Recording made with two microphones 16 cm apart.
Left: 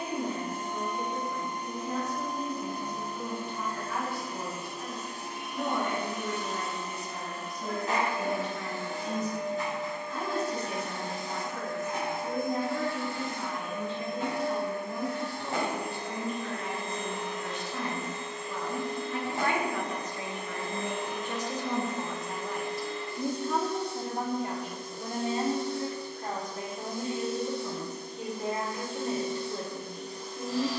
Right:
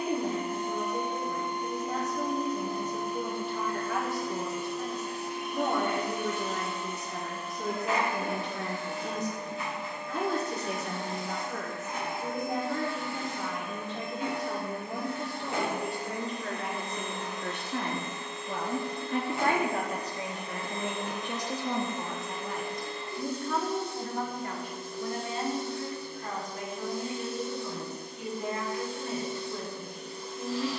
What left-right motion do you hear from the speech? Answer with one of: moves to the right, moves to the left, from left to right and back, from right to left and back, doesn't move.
moves to the left.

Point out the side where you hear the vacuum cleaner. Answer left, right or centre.
left.